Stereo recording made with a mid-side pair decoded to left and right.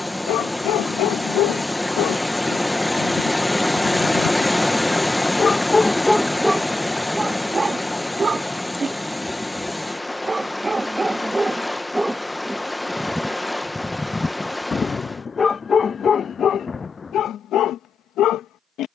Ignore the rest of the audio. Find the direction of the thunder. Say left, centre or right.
left.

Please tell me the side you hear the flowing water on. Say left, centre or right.
centre.